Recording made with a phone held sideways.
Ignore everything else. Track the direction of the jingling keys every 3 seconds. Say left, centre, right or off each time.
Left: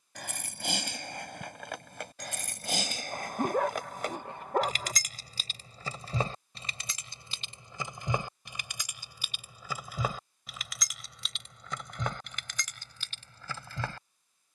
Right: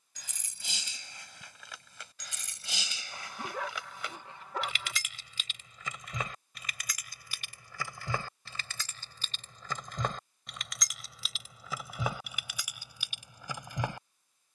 left, left, left, centre, centre.